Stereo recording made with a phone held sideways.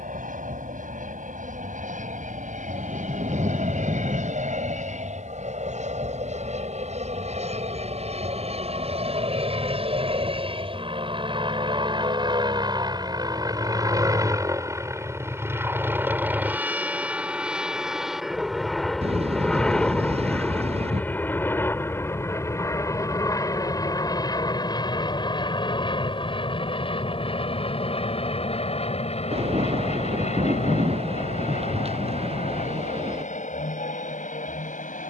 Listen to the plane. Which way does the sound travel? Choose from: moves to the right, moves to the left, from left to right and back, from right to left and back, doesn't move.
moves to the left.